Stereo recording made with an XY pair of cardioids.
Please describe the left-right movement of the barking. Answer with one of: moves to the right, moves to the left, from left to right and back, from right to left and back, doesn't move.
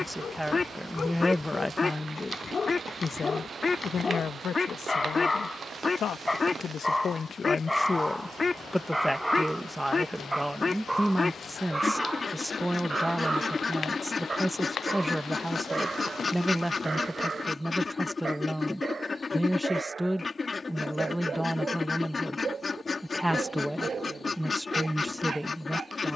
moves to the right.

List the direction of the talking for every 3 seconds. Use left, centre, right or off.
centre, left, left, centre, centre, centre, centre, centre, centre.